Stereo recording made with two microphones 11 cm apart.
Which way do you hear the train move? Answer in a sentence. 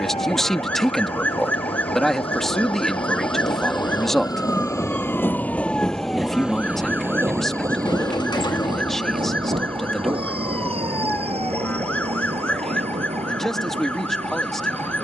In this clip you hear the train go from the left side to the right.